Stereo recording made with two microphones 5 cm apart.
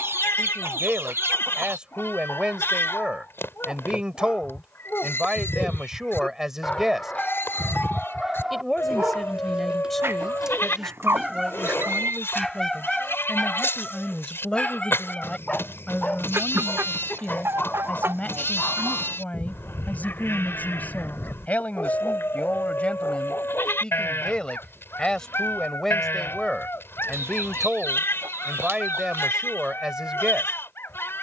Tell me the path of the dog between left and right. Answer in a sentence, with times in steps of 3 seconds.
In this clip you hear the dog on the left from 0 s, in the centre from 6 s and on the left from 15 s.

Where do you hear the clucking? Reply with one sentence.
You can hear the clucking on the right.